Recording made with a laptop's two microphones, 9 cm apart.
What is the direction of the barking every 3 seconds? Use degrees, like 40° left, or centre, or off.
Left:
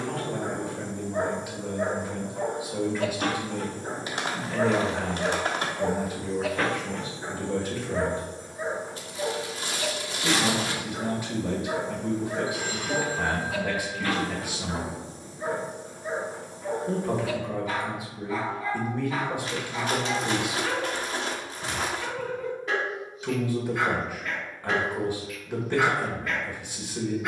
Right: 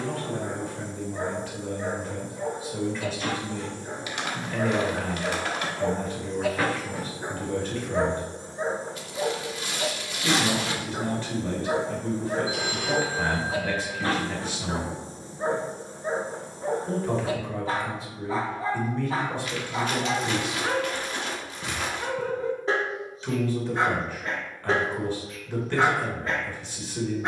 60° left, 30° left, 10° right, 30° right, 30° right, 30° right, 30° right, 30° right, 30° right.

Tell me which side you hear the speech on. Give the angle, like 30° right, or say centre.
10° left.